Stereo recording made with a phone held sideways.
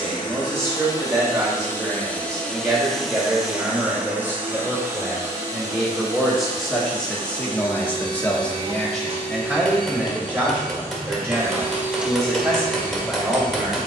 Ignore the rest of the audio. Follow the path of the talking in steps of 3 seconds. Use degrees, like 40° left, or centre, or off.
20° right, 10° right, 10° left, 10° right, 10° right.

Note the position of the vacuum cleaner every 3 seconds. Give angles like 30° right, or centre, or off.
20° left, 10° right, 30° right, 30° right, 20° left.